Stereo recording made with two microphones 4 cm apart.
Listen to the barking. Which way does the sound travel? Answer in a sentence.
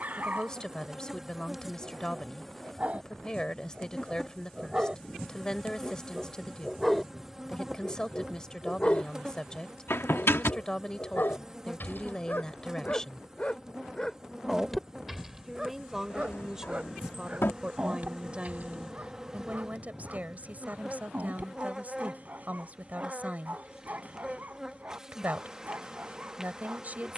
In this clip you hear the barking move from right to left and back again.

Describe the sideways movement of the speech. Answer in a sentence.
You can hear the speech move to the right.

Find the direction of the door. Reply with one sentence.
You can hear the door on the left.